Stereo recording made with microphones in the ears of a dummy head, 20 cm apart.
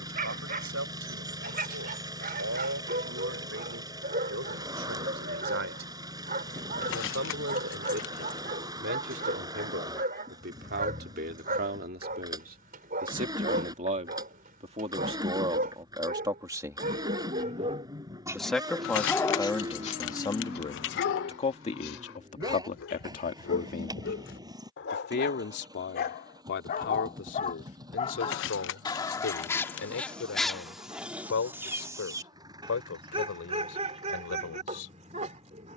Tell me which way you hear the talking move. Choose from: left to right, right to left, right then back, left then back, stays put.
right to left.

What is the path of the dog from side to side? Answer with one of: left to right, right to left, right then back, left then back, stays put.
left then back.